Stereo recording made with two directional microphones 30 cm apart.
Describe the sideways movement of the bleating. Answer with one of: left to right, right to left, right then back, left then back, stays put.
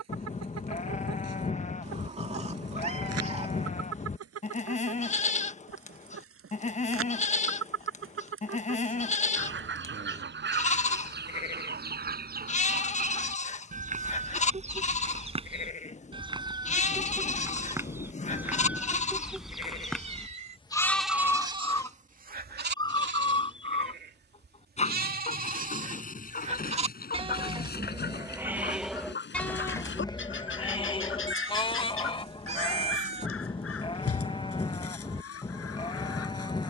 right then back.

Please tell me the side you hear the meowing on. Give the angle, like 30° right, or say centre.
20° right.